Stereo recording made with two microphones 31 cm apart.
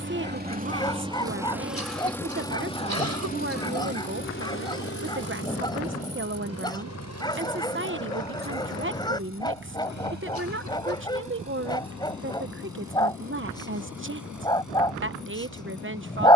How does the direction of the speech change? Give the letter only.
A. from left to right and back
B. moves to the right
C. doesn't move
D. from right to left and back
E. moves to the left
C.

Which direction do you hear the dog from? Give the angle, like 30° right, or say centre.
10° left.